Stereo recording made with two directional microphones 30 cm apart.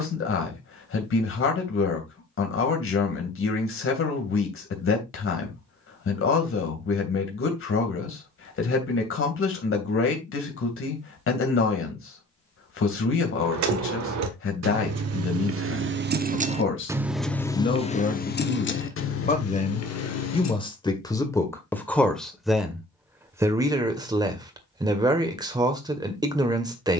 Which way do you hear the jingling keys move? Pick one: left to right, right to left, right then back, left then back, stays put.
right to left.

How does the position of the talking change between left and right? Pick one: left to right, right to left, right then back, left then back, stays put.
left to right.